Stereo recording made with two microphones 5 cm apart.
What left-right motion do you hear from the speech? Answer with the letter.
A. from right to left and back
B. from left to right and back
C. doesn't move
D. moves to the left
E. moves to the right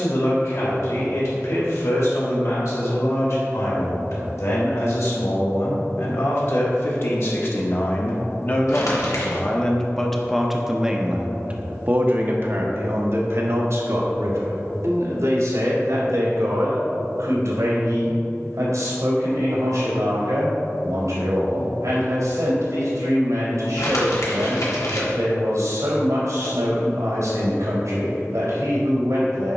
E.